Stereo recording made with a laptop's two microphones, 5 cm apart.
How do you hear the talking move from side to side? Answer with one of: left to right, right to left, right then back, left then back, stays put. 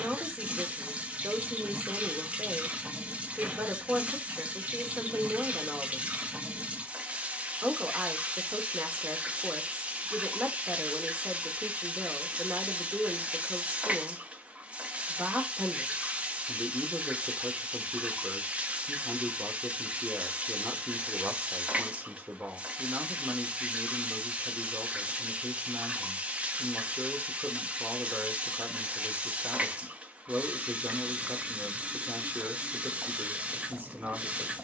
stays put.